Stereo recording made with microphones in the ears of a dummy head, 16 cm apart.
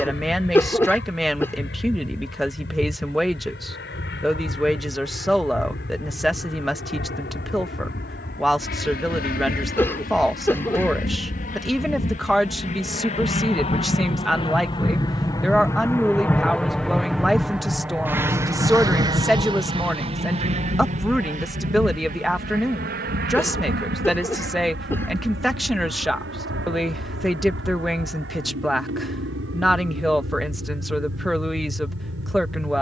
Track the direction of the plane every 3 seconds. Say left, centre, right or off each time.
left, left, left, left, left, centre, right, right, right, right, right.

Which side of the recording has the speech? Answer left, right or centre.
centre.